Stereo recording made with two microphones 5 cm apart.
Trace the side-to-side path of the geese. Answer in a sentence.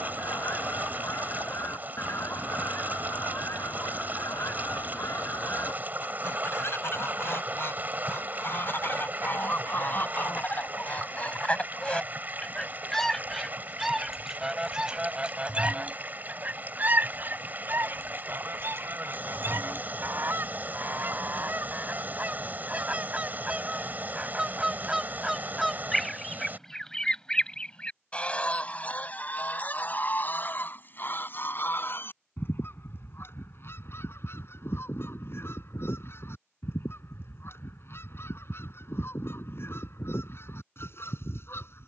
In this clip you hear the geese move from left to right and back again.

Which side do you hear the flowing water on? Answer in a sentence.
You can hear the flowing water on the right.